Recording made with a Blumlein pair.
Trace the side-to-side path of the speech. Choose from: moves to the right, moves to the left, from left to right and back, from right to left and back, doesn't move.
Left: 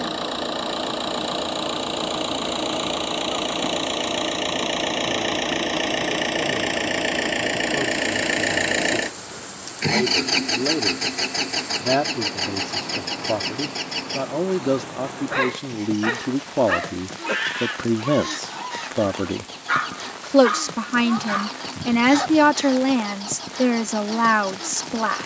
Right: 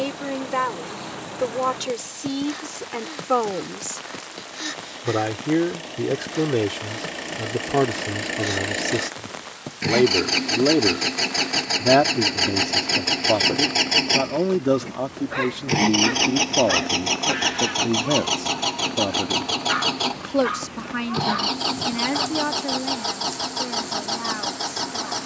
moves to the left.